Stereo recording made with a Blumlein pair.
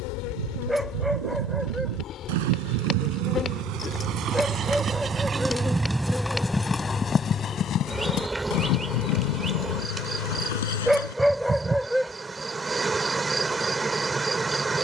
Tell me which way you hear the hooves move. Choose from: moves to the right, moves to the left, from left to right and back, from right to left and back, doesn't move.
moves to the left.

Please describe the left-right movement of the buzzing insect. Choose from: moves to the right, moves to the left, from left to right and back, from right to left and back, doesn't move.
moves to the right.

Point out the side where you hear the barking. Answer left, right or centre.
centre.